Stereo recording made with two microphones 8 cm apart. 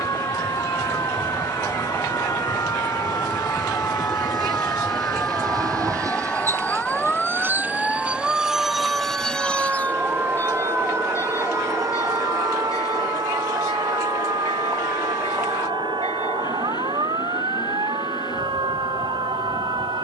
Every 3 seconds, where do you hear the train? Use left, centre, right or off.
right, right, right, left, left, left, left.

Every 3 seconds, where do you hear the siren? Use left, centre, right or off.
left, left, centre, right, right, right, right.